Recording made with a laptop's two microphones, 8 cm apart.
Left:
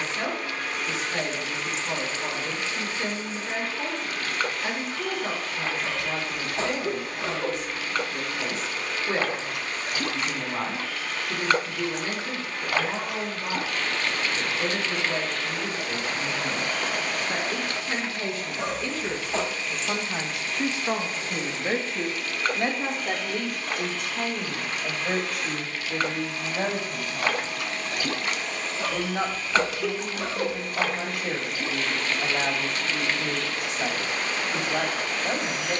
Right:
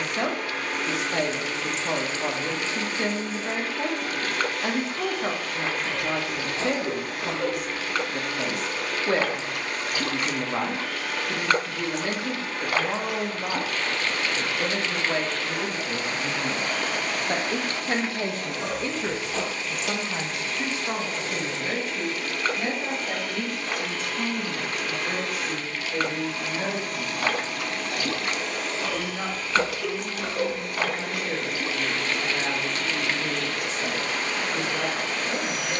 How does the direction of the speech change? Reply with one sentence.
In this clip you hear the speech move to the left.